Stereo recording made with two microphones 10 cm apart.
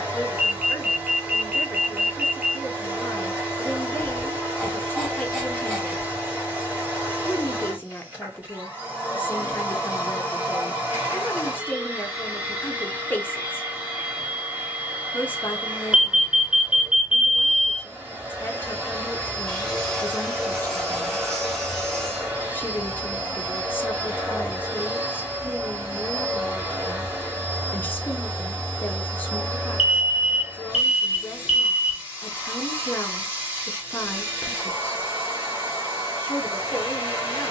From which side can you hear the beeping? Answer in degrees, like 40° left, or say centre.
10° right.